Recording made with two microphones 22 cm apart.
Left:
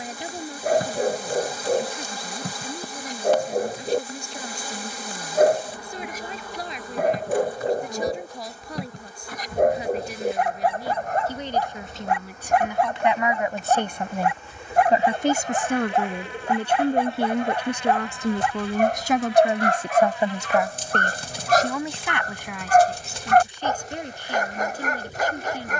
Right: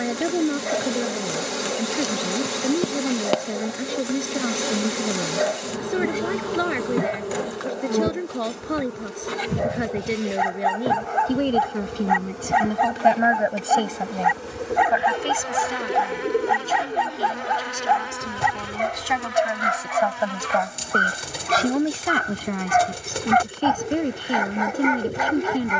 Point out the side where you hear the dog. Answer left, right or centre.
left.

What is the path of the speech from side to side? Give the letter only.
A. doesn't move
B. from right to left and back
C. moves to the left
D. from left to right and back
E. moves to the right
B.